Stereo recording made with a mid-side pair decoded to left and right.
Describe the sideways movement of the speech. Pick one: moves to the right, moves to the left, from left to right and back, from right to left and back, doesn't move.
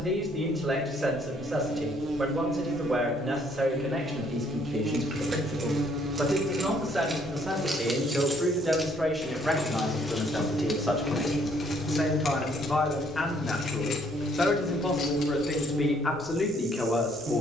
moves to the left.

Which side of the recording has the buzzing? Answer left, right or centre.
right.